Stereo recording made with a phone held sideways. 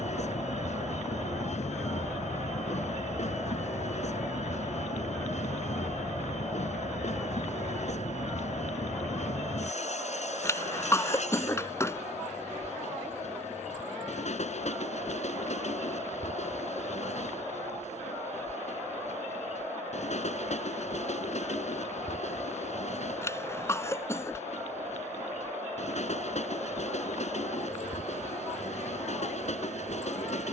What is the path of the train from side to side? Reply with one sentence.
You can hear the train stay put.